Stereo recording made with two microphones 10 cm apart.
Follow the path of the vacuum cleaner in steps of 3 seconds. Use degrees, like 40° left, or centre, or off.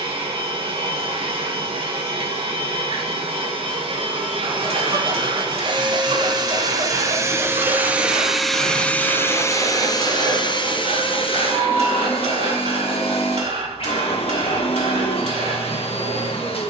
60° right, 60° right, 20° right, 50° left, 70° left, 70° left.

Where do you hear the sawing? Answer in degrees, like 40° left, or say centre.
70° right.